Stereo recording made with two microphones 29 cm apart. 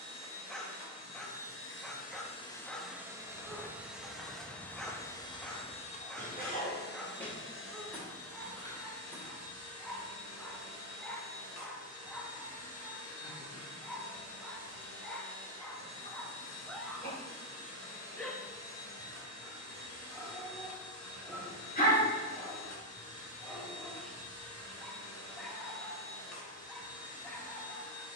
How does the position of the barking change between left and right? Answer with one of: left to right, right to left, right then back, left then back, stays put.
stays put.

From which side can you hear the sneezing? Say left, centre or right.
left.